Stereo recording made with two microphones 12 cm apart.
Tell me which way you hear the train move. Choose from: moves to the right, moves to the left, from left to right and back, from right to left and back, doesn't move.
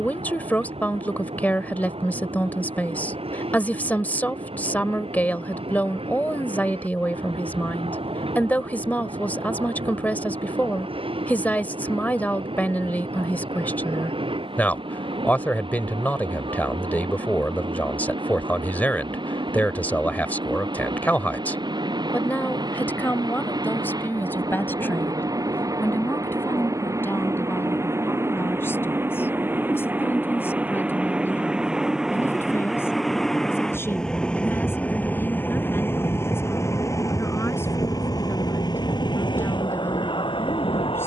moves to the left.